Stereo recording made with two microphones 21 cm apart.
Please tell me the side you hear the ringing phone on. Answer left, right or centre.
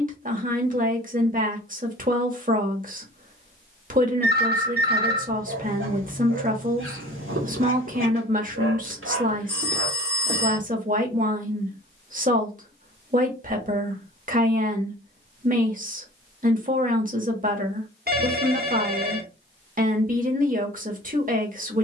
right.